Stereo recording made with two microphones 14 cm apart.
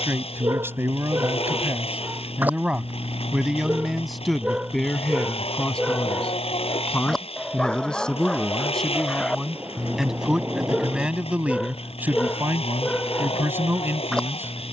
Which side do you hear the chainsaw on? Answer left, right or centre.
left.